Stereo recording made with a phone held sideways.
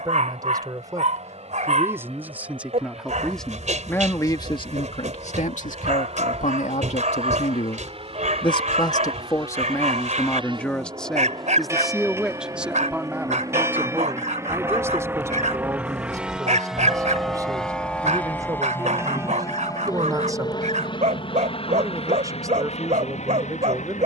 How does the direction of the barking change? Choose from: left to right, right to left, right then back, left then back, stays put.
stays put.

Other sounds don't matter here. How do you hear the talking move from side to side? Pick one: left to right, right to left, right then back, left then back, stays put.
left then back.